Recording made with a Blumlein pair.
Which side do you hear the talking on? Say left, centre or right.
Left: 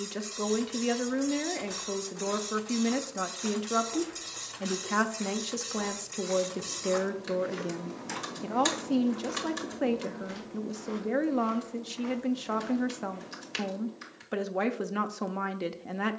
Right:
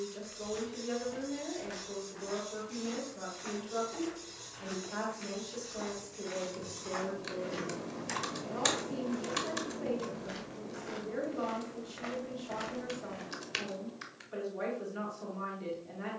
left.